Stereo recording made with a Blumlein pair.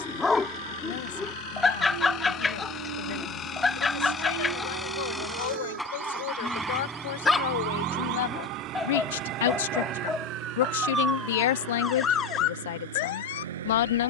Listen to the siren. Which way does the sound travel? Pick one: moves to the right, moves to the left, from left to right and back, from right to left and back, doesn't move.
moves to the left.